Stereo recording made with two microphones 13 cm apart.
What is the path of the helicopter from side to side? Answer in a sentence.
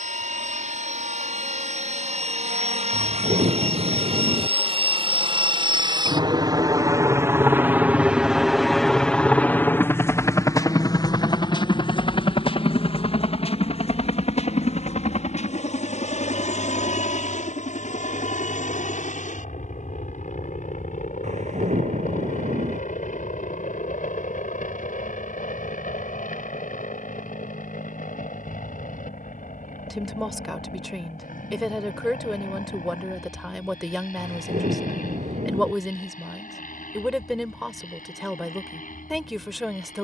In this clip you hear the helicopter go from the right side to the left.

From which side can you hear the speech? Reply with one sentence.
In this clip you hear the speech in the centre.